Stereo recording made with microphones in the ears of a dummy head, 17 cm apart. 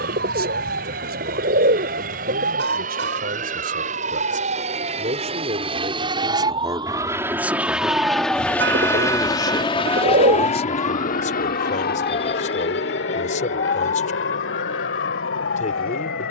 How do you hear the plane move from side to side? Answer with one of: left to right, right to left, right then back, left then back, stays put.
right to left.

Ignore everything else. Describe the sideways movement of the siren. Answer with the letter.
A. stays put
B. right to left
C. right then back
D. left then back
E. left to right
B.